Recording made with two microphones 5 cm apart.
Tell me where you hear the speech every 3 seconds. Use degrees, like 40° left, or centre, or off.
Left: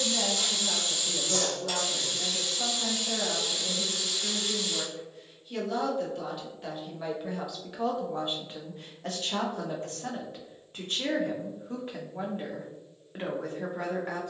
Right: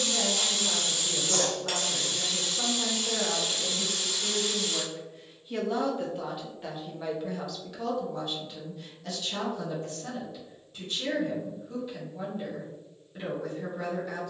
40° right, 30° right, 10° left, 50° left, 50° left.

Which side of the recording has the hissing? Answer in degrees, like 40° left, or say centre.
50° right.